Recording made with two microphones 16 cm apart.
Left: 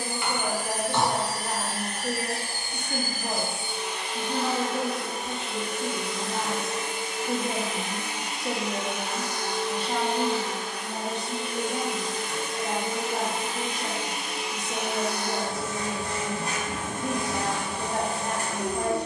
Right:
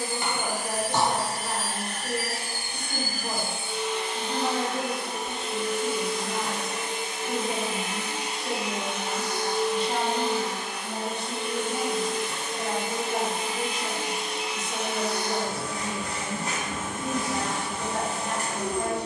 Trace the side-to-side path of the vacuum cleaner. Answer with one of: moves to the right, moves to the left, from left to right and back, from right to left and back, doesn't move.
from left to right and back.